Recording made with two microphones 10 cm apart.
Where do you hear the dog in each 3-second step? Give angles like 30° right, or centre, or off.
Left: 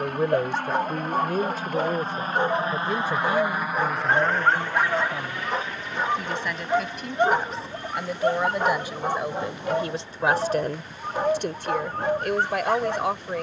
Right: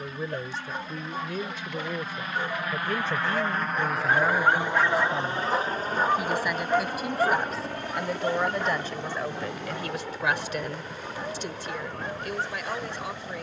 70° left, 20° left, 30° left, 80° left, 80° left.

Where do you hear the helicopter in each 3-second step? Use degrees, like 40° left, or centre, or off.
50° left, 10° right, 50° right, 70° right, 70° right.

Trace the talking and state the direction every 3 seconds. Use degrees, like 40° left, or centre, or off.
40° left, centre, centre, 40° left, 60° left.